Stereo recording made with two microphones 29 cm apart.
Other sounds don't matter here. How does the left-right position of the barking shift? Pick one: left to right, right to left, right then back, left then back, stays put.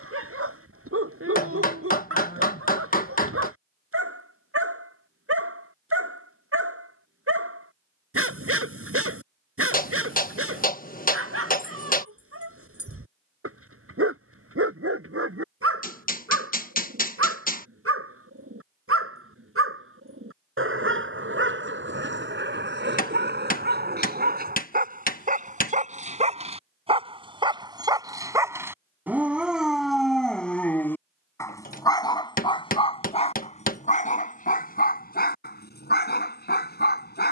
right to left.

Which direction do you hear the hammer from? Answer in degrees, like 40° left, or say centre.
30° left.